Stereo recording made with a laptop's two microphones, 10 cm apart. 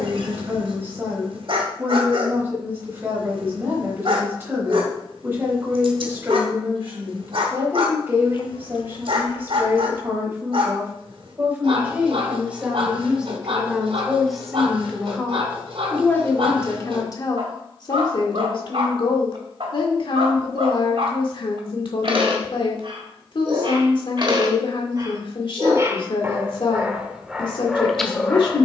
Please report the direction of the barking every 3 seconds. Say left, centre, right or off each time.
right, right, right, right, right, right, right, right, right, centre.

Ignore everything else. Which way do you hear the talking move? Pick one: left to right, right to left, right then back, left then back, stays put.
right to left.